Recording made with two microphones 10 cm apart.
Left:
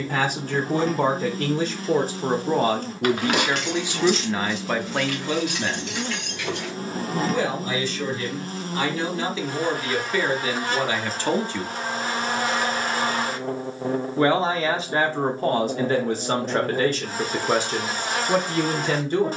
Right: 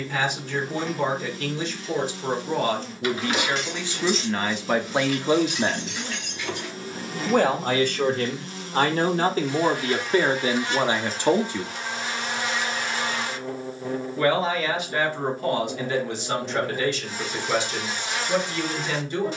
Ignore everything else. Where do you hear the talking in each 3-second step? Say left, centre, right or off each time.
left, centre, right, right, left, left, left.